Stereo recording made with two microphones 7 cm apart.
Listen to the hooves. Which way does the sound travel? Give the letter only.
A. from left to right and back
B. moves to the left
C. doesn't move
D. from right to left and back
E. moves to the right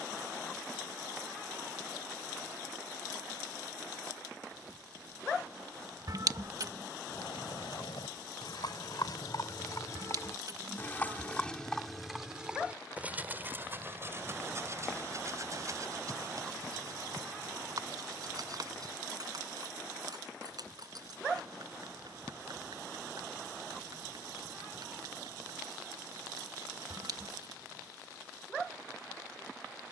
E.